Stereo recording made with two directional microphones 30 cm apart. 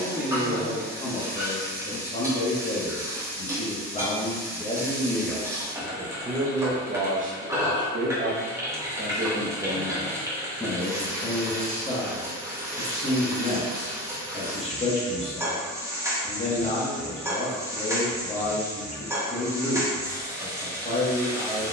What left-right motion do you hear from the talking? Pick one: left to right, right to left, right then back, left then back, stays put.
right then back.